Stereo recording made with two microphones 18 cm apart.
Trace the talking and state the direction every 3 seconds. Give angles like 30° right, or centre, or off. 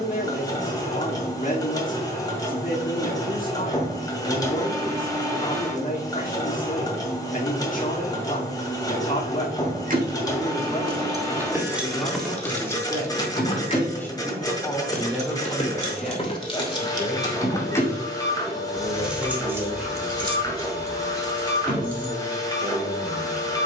50° left, 50° left, 50° left, 30° left, 10° left, centre, 10° right, 10° right.